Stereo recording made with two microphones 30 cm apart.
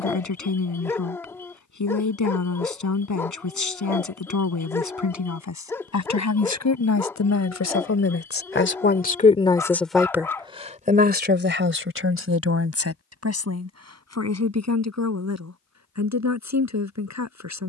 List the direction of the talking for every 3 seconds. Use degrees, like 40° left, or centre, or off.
80° left, 80° left, 60° left, 10° right, 60° right, 70° right.